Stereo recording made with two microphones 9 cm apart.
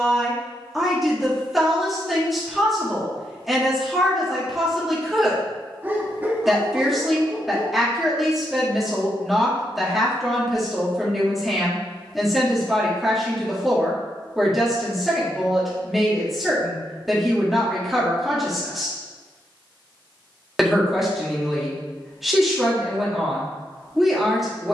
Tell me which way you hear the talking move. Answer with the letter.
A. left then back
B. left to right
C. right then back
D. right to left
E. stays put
E.